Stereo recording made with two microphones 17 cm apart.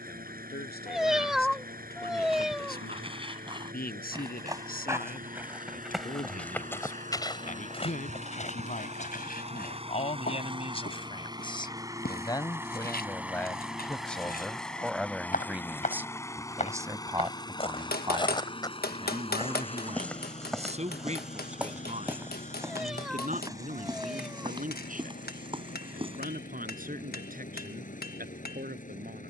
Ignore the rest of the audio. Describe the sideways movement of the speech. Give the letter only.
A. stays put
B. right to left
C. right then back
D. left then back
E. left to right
E.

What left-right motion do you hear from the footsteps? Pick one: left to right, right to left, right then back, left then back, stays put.
left then back.